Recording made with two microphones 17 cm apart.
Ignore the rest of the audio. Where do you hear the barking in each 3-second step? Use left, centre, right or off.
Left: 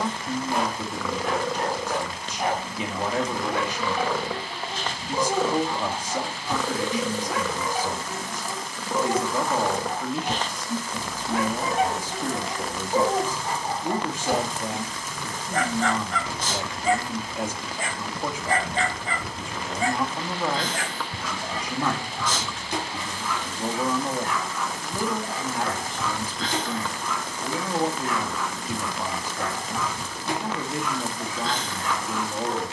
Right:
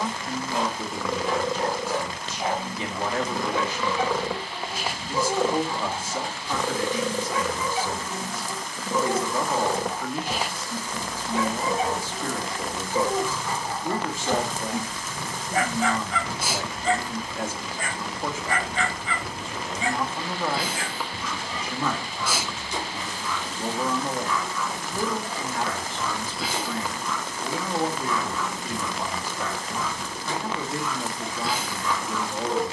left, left, left, left, left, centre, left, left, left, left, left.